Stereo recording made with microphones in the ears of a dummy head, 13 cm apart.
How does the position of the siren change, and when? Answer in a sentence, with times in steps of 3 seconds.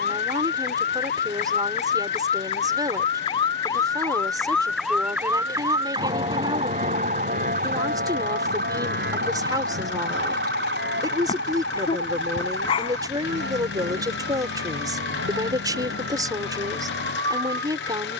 In this clip you hear the siren on the left from 0 s, in the centre from 3 s and on the right from 6 s.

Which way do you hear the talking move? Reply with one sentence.
In this clip you hear the talking stay put.